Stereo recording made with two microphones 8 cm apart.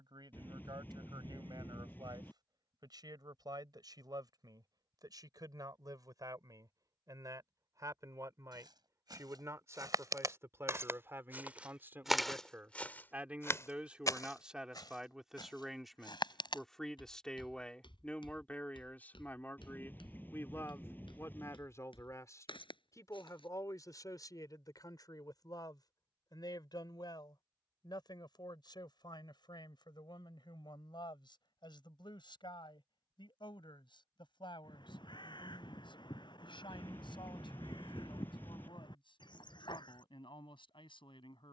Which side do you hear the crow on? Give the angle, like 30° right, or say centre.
60° left.